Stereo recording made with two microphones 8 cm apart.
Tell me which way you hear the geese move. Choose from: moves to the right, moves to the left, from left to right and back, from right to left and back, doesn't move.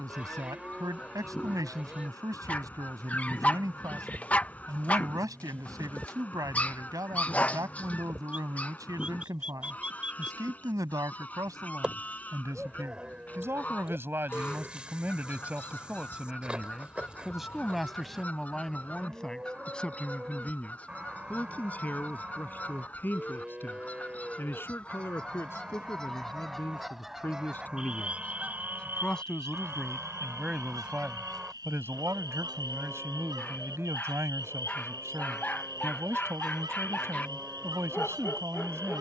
moves to the right.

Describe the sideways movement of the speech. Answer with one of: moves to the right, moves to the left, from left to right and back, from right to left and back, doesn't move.
from right to left and back.